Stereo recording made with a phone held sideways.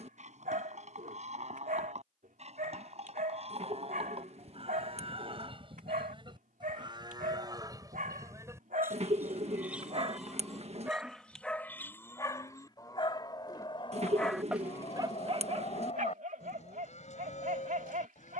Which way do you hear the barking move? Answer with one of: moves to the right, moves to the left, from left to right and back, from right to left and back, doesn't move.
from right to left and back.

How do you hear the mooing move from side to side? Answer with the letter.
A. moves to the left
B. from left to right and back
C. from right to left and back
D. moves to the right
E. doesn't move
A.